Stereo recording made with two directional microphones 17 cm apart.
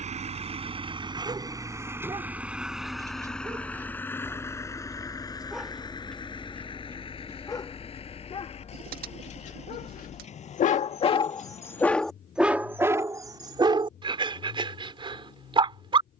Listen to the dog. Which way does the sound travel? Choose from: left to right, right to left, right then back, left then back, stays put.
left then back.